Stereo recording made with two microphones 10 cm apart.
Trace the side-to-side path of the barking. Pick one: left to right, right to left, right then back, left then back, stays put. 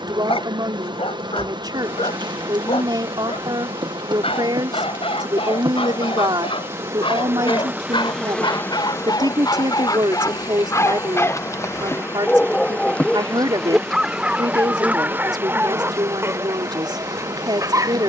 left to right.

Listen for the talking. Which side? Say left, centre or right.
right.